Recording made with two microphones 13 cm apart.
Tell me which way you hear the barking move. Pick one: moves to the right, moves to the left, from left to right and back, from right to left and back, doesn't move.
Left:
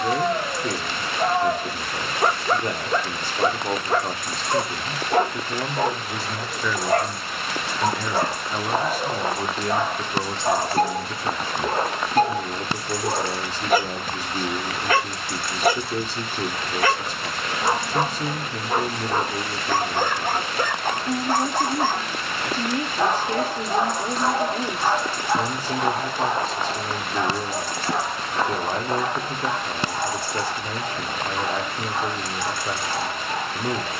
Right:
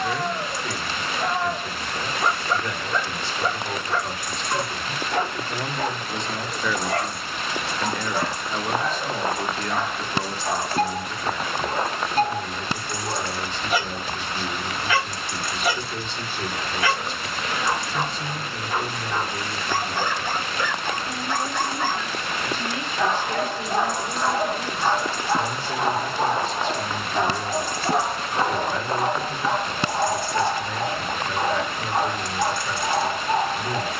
moves to the right.